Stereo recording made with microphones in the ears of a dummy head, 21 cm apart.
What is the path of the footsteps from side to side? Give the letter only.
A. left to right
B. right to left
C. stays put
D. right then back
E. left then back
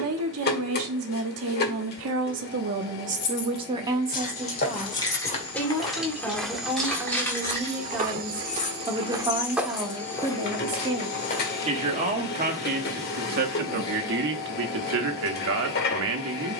D.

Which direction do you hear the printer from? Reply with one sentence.
In this clip you hear the printer on the left.